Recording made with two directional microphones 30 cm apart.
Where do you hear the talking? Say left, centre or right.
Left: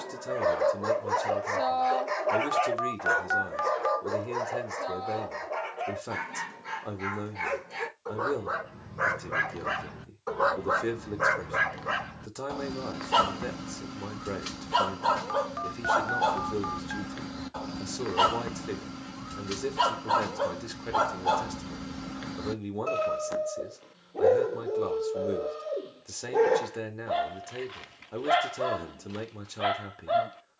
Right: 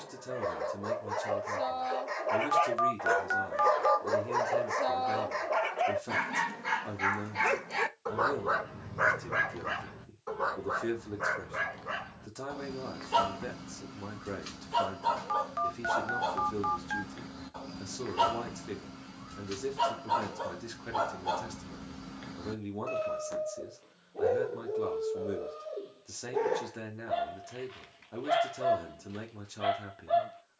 left.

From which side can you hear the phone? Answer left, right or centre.
centre.